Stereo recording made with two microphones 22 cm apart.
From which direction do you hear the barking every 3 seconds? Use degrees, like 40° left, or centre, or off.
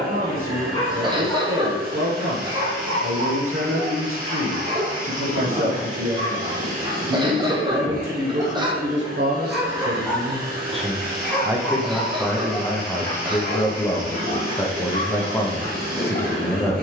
centre, 30° right, 20° right, centre, 30° left, 30° left.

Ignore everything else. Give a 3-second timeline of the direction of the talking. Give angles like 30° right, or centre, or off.
70° right, 70° right, 60° right, 30° right, 10° left, 10° left.